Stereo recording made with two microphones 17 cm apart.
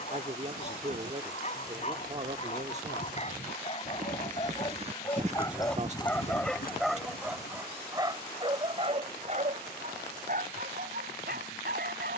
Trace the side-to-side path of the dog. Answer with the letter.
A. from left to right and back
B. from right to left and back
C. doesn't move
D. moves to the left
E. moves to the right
E.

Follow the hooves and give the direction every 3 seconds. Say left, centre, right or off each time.
right, right, left, off.